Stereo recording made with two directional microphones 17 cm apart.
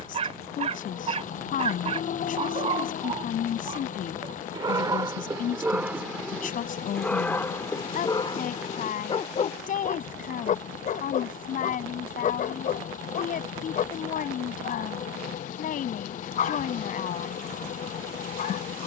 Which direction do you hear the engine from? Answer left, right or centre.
left.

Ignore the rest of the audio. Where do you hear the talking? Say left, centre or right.
left.